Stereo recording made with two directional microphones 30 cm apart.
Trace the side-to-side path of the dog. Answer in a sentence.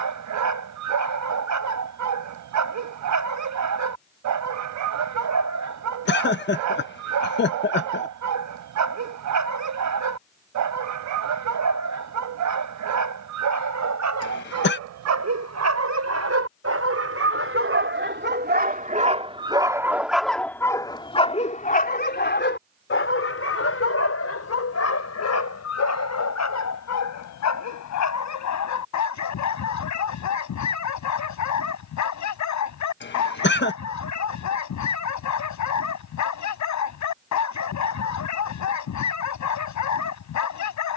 You can hear the dog go from the right side to the left.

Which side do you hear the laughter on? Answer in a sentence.
In this clip you hear the laughter on the left.